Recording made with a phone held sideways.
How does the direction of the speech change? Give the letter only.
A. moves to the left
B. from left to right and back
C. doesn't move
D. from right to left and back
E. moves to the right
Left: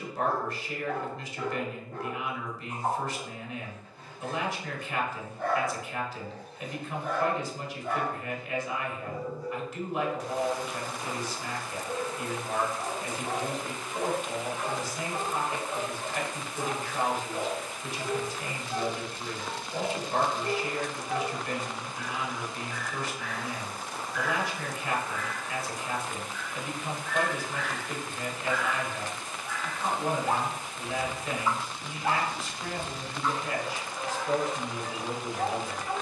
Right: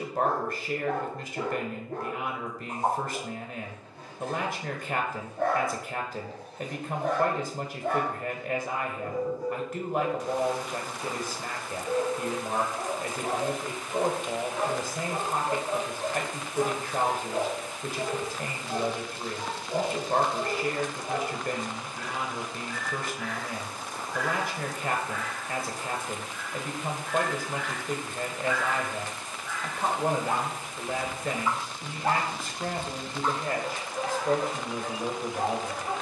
C.